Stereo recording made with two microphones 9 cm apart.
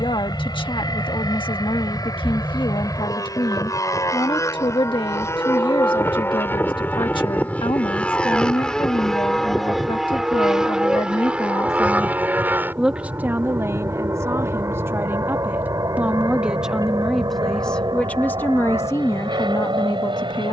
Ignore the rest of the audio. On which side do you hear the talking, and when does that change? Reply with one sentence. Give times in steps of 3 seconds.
You can hear the talking on the left from 0 s, on the right from 12 s, in the centre from 15 s and on the left from 18 s.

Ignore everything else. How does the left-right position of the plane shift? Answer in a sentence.
You can hear the plane move from left to right.